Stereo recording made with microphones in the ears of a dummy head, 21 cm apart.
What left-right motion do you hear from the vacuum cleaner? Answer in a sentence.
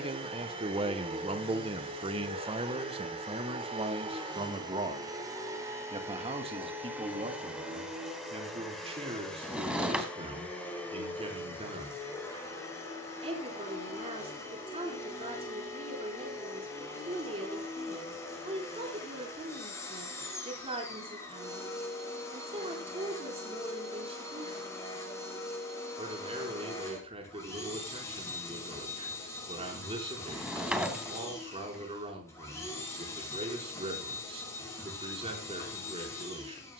In this clip you hear the vacuum cleaner travel towards the left.